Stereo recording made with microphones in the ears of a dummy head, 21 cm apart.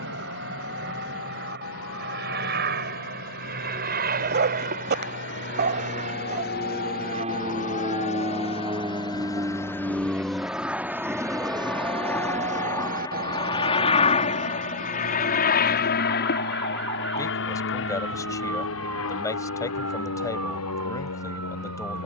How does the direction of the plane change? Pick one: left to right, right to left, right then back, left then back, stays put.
right to left.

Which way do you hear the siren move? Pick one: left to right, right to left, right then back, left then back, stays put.
left to right.